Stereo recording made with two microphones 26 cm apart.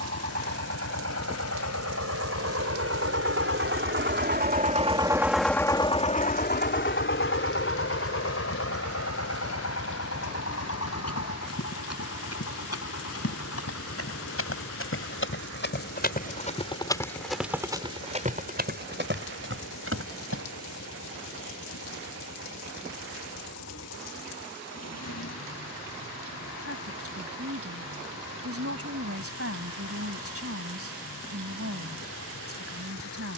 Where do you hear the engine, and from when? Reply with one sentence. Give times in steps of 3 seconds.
In this clip you hear the engine on the right from 0 s and on the left from 6 s.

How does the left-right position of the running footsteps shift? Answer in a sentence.
You can hear the running footsteps travel towards the right.